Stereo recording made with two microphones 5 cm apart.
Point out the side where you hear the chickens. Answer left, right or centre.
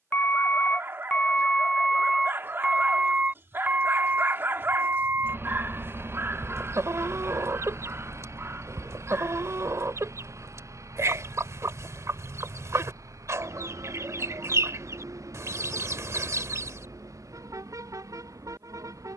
right.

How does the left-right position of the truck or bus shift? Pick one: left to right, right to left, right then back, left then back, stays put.
left to right.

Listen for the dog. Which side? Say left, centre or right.
right.